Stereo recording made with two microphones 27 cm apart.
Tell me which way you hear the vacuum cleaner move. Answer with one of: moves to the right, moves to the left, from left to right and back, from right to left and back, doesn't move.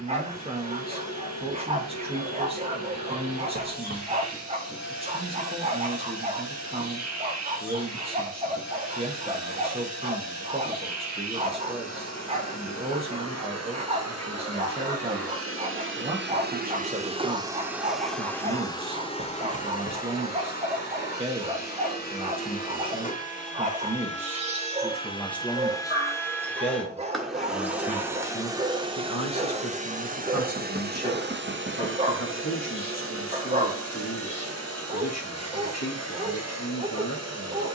from right to left and back.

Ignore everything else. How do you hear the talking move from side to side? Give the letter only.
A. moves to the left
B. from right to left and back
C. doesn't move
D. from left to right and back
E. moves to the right
A.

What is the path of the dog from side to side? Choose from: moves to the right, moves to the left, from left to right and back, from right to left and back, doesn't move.
doesn't move.